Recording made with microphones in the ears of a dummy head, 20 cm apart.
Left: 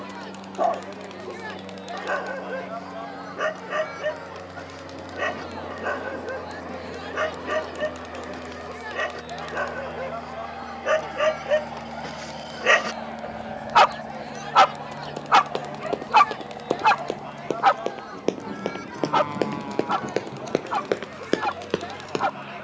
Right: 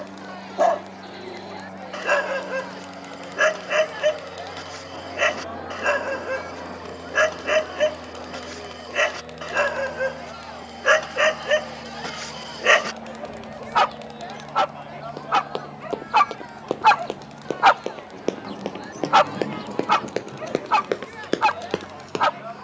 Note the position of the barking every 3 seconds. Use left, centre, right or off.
right, right, right, right, centre, centre, right, right.